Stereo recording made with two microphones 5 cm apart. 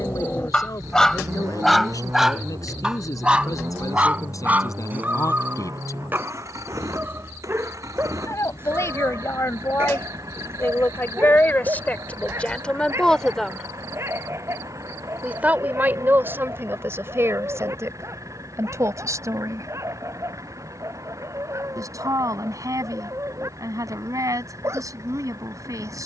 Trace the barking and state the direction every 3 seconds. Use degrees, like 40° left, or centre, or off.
10° left, 30° right, 40° right, 40° right, 50° right, 50° right, 50° right, 50° right, 50° right.